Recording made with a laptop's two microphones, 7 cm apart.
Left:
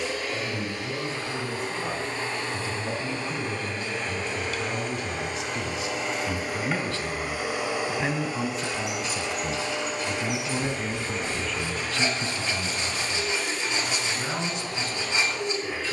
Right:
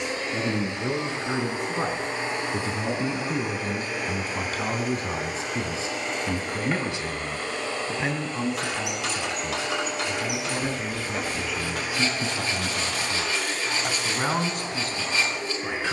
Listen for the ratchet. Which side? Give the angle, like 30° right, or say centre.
80° right.